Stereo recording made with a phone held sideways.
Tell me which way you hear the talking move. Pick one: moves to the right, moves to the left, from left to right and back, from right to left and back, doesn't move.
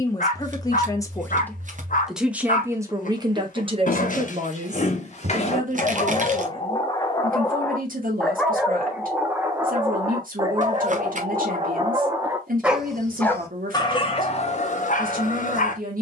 moves to the right.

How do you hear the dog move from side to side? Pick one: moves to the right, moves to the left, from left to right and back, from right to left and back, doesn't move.
from left to right and back.